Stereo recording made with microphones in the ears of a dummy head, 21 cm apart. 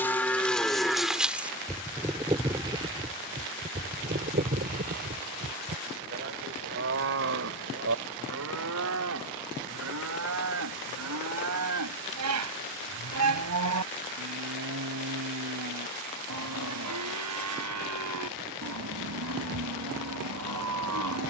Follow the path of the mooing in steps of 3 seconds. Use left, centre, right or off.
centre, right, right, right, right, right, right.